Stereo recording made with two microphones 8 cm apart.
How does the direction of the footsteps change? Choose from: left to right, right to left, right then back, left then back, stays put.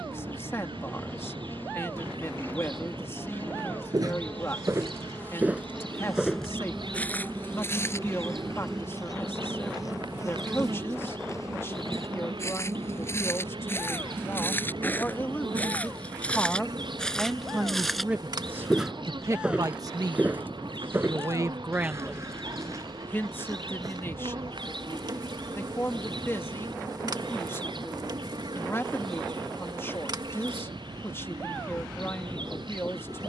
left then back.